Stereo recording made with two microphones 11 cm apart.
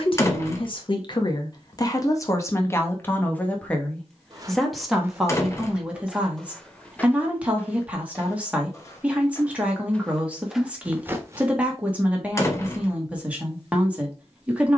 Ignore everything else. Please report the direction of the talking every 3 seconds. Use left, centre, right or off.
left, centre, centre, centre, centre.